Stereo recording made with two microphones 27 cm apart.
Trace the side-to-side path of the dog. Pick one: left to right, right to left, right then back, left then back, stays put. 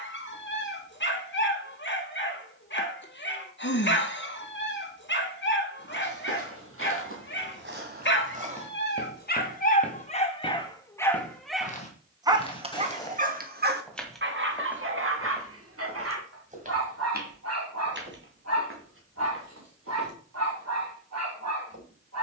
left to right.